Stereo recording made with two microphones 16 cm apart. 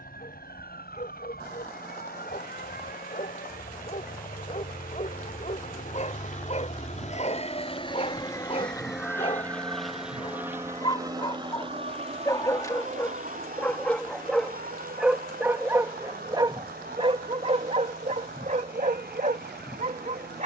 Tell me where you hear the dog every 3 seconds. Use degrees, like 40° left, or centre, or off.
50° left, 50° left, 40° left, 30° left, 10° left, 30° right, 50° right.